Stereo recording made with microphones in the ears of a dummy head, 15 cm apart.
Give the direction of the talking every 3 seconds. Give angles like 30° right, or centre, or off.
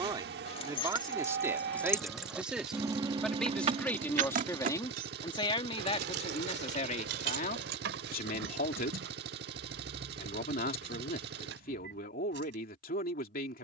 10° right, 20° left, 50° left, 60° left, 60° left.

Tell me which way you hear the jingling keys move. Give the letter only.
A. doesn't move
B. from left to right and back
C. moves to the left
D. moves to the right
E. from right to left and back
D.